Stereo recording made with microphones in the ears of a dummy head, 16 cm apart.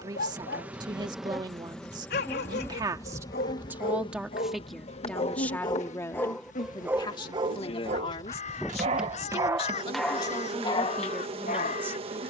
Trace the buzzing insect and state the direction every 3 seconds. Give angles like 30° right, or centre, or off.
centre, 30° left, 30° left, 30° right.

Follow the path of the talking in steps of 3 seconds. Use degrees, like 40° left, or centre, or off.
20° right, centre, 30° left, 20° left.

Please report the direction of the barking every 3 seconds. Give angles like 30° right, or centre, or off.
60° left, 40° left, 20° right, 10° left.